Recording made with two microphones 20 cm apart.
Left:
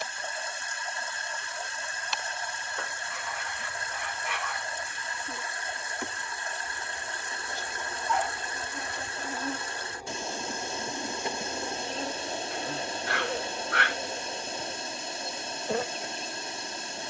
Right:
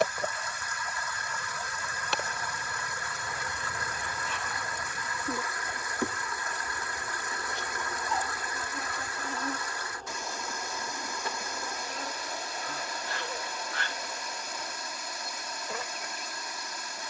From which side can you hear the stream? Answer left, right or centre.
left.